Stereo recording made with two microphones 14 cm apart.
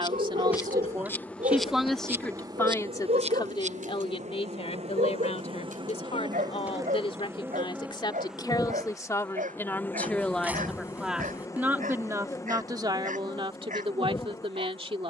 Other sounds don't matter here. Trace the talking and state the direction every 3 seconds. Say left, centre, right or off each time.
centre, left, left, centre, right.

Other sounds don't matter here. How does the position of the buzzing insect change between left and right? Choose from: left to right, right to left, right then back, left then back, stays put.
right then back.